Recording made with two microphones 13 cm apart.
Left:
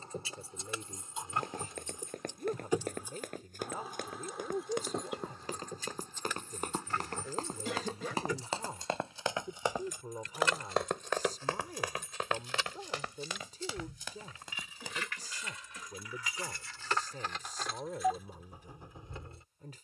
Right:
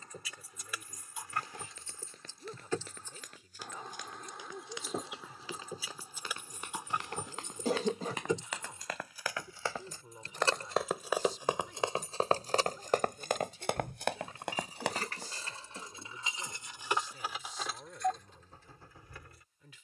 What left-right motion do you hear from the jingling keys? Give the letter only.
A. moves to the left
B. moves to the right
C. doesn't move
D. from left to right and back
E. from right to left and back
D.